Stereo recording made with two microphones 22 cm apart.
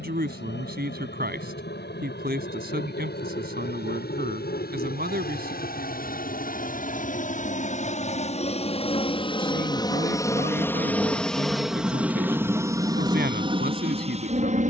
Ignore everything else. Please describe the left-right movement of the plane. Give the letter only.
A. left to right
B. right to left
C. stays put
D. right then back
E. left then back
A.